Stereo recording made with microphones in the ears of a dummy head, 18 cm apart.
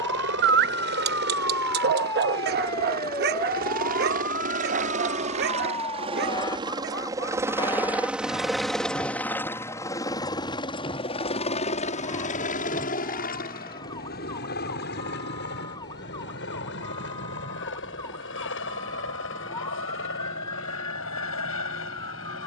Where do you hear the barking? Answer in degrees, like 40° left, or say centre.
50° right.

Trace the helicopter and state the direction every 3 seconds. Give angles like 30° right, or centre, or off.
60° right, 40° right, 10° right, 20° left, 40° left, 60° left, 60° left, 70° left.